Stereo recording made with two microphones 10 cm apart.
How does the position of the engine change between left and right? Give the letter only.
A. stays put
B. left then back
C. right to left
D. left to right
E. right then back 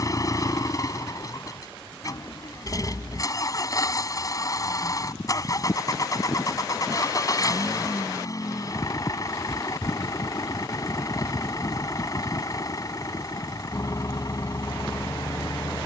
A.